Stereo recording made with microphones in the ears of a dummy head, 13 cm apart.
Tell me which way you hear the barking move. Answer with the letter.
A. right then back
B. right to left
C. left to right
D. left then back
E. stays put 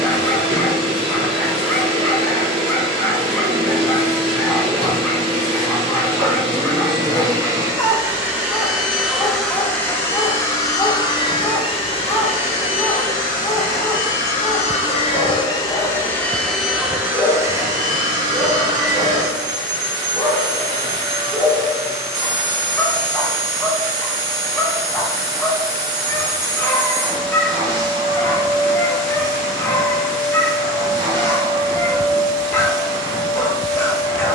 E.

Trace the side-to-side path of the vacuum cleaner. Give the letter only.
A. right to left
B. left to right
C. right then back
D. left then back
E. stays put
D.